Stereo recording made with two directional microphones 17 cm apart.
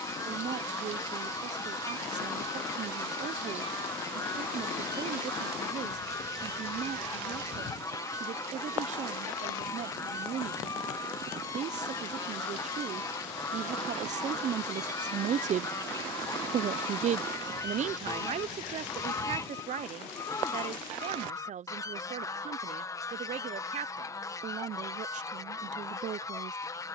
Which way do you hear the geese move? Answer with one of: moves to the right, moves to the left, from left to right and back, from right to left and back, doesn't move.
doesn't move.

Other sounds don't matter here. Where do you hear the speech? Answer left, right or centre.
right.